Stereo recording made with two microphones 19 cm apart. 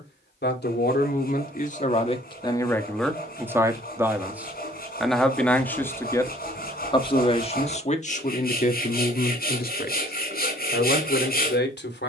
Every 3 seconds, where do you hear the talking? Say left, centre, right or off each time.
left, centre, left, left.